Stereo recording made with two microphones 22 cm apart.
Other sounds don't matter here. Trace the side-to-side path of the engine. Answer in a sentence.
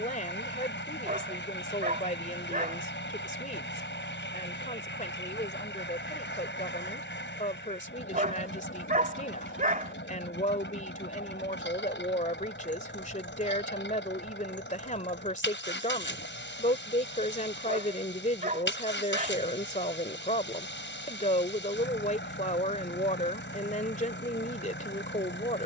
You can hear the engine stay put.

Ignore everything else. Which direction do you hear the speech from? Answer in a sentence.
You can hear the speech on the left.